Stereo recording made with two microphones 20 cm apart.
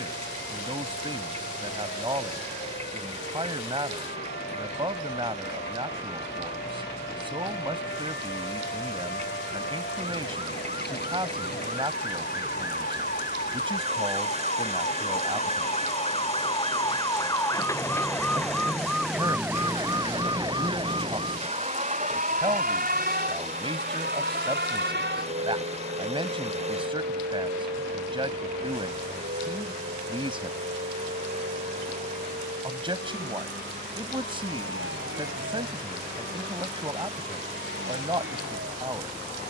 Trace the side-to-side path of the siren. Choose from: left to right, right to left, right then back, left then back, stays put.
left to right.